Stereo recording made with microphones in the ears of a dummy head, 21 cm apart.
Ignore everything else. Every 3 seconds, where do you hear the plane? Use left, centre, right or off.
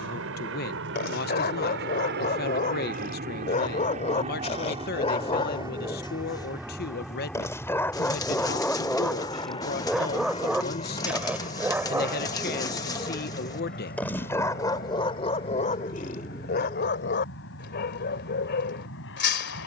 right, right, centre, left, left, left, left.